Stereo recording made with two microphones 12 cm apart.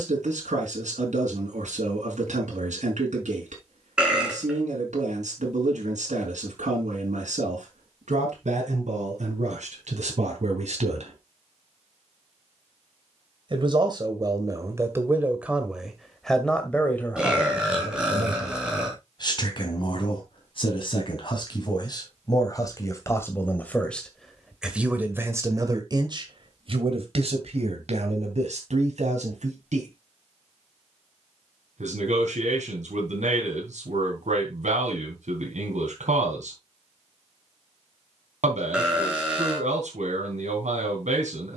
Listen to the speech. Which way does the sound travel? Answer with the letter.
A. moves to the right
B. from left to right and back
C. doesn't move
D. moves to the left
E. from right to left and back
E.